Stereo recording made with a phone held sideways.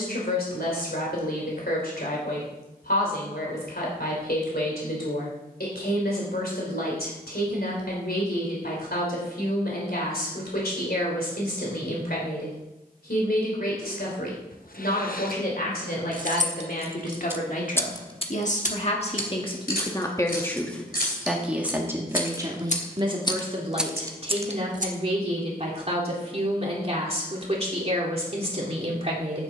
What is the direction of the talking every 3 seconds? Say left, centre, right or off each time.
left, left, left, left, left, left, left, right, right, right.